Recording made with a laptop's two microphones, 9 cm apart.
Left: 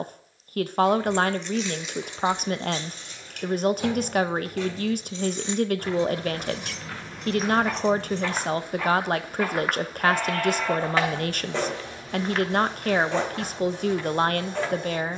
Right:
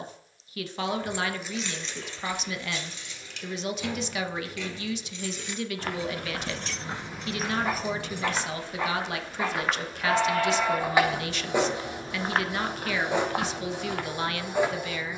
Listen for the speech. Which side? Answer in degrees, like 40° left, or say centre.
50° left.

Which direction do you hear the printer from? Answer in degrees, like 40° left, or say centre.
10° right.